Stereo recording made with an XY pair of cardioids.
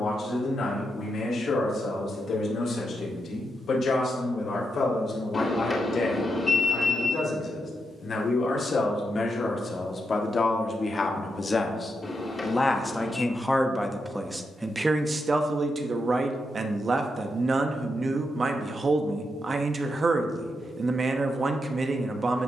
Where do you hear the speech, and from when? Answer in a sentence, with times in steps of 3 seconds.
In this clip you hear the speech on the left from 0 s, in the centre from 12 s and on the right from 15 s.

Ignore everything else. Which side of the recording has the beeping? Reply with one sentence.
In this clip you hear the beeping on the left.